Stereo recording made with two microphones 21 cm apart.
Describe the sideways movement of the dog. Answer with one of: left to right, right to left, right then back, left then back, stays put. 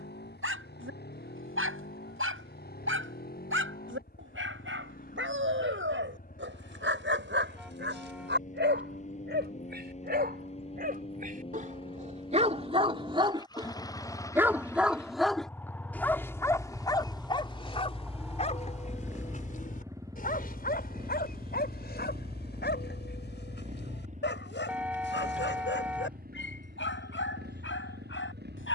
right to left.